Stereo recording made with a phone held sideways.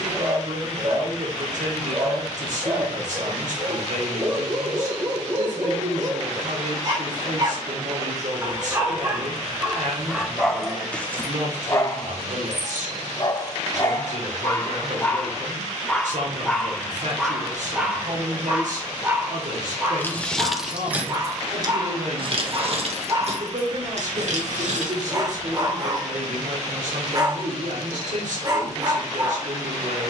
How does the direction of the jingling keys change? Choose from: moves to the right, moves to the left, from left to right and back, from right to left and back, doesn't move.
moves to the right.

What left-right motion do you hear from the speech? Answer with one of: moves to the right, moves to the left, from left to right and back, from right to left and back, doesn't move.
doesn't move.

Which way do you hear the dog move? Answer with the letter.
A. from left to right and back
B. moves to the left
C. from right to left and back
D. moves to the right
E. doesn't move
C.